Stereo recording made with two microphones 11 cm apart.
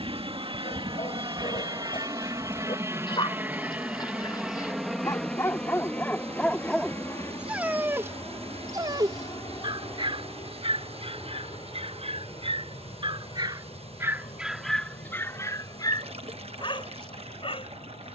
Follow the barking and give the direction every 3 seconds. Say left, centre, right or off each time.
left, left, centre, right, right, left.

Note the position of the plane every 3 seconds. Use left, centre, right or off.
right, centre, left, left, left, left.